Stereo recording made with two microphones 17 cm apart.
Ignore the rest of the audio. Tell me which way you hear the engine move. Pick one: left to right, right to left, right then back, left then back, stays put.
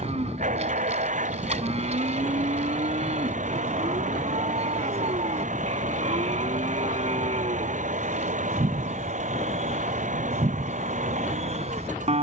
stays put.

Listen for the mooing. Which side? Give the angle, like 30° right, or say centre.
40° right.